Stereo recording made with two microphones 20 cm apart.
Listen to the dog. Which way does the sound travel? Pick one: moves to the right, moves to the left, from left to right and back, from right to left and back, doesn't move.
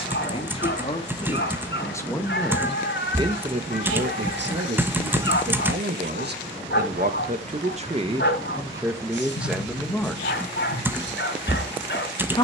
doesn't move.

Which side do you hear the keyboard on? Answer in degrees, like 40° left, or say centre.
10° right.